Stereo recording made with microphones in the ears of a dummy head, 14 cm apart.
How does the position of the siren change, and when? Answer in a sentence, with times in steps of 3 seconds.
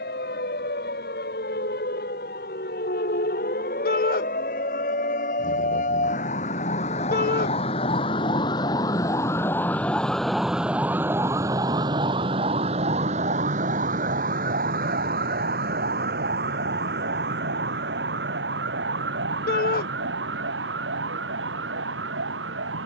You can hear the siren on the left from 0 s, in the centre from 9 s and on the right from 12 s.